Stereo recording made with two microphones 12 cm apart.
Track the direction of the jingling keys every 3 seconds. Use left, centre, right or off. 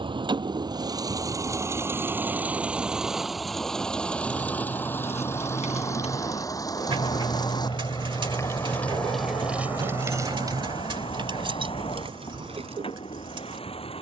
off, left, left, right, right.